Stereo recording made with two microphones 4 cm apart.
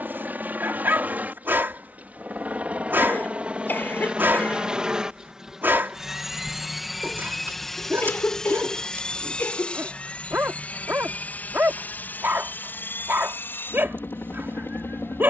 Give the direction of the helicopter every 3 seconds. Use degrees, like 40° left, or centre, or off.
40° right, 20° right, centre, 30° left, 50° left.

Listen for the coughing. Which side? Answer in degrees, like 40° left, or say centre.
50° left.